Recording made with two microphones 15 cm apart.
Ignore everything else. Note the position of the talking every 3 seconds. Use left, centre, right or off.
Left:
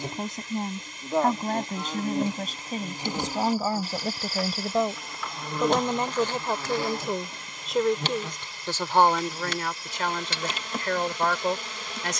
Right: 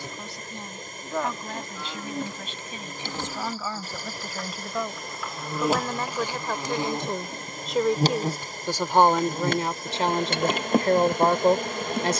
left, left, centre, right.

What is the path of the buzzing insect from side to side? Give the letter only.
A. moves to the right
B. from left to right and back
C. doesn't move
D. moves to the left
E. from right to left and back
A.